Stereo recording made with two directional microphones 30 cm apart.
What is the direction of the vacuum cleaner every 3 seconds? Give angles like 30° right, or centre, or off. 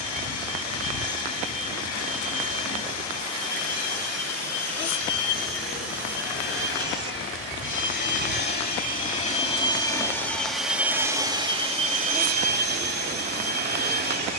60° left, 60° left, 40° left, centre, 30° right.